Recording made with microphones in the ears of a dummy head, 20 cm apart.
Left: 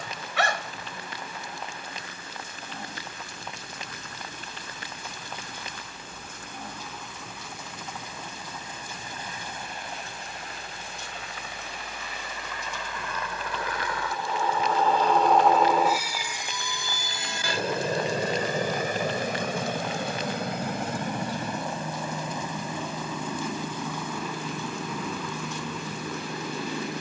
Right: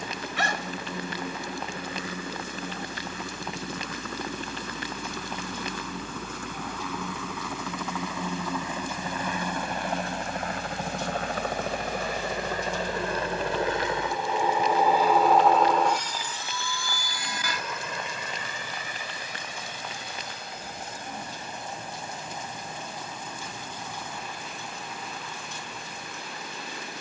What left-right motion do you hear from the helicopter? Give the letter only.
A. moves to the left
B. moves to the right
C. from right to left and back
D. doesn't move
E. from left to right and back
A.